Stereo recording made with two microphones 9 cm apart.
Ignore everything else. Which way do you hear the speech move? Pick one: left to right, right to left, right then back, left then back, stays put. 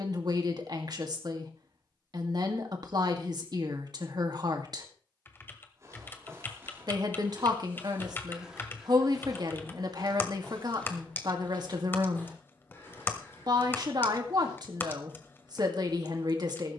stays put.